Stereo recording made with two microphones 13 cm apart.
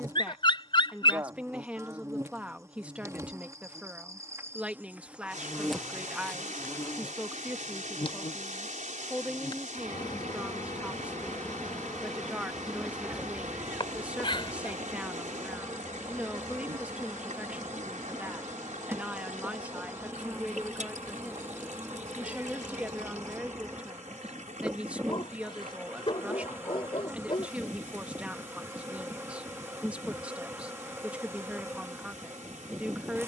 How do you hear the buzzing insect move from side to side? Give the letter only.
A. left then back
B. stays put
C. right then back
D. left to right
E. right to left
A.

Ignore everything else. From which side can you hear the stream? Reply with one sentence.
In this clip you hear the stream on the right.